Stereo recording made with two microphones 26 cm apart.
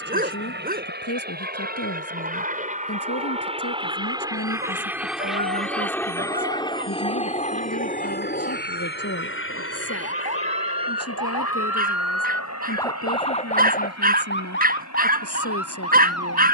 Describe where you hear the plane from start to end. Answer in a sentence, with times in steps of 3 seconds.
In this clip you hear the plane on the right from 0 s, in the centre from 3 s and on the left from 6 s.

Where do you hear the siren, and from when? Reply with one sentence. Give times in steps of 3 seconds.
In this clip you hear the siren on the right from 0 s and on the left from 12 s.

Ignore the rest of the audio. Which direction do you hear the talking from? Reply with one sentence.
You can hear the talking on the left.